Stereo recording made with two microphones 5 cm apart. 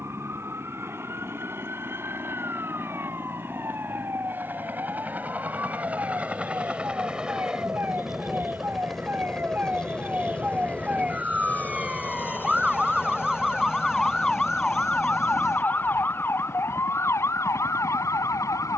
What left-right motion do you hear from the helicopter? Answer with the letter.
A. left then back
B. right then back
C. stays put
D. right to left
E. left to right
D.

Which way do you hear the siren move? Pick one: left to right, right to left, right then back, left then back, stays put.
right to left.